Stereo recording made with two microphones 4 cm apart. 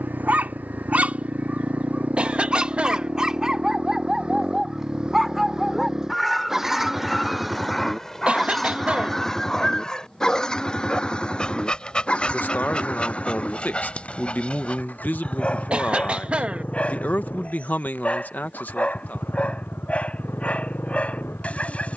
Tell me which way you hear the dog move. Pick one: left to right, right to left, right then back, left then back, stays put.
right to left.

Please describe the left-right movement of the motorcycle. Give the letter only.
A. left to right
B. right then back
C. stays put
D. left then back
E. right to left
E.